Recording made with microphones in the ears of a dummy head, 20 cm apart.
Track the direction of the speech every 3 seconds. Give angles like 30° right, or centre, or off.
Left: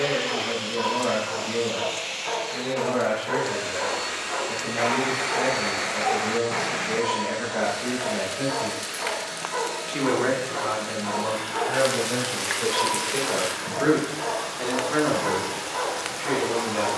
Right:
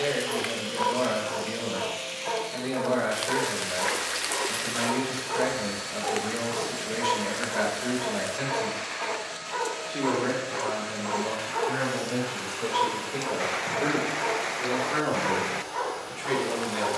40° right, 40° right, 30° right, 60° left, 60° left, 10° right.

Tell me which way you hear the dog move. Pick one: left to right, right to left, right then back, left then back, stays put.
stays put.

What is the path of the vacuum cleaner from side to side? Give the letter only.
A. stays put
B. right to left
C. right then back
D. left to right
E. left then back
A.